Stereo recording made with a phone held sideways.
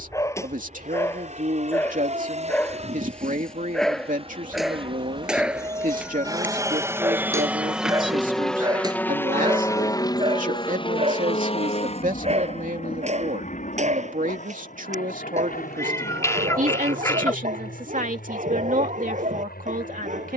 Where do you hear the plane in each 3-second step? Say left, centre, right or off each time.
right, right, centre, left, left, left, left.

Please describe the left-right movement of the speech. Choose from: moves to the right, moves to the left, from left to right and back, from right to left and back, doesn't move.
doesn't move.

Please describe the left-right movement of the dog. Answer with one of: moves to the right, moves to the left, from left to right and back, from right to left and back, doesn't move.
moves to the right.